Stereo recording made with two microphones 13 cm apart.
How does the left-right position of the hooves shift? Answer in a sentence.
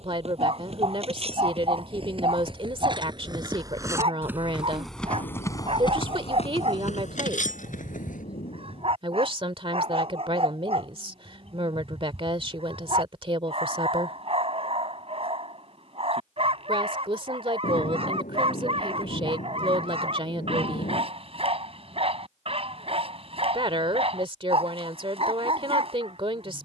In this clip you hear the hooves go from the right side to the left.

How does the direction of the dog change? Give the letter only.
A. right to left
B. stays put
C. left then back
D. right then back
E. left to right
B.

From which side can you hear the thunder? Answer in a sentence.
In this clip you hear the thunder on the left.